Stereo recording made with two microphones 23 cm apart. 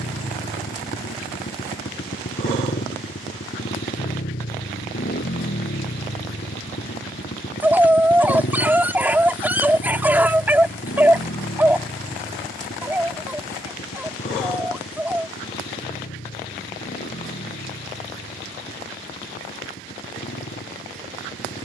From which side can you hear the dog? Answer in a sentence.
You can hear the dog in the centre.